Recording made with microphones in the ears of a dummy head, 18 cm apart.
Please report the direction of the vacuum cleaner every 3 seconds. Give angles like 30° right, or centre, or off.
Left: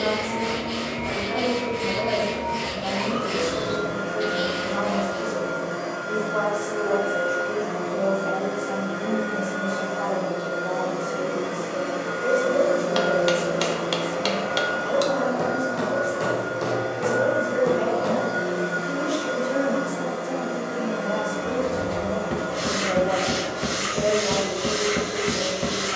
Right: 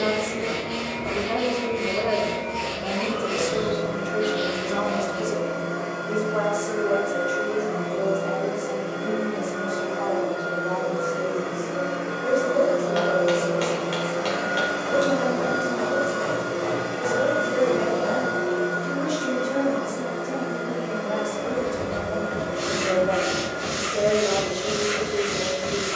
70° left, 70° left, 70° left, 60° left, 10° left, 40° right, 40° left, 60° left, 60° left.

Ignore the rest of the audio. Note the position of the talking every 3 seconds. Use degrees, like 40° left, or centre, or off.
60° right, 60° right, 10° right, 10° left, 20° left, 10° left, centre, 20° right, 40° right.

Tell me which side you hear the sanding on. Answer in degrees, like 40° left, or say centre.
60° left.